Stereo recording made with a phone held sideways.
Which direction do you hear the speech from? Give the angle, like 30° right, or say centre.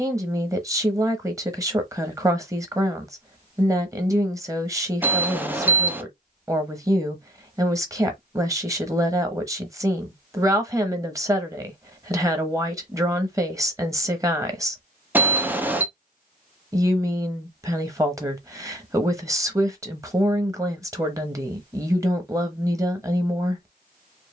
20° right.